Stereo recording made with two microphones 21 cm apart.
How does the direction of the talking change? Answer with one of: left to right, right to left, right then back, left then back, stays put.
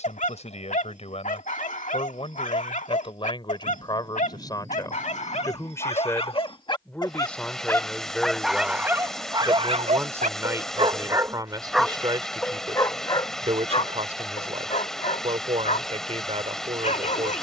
left to right.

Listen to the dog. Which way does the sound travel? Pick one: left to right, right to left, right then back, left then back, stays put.
right then back.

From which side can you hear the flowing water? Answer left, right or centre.
centre.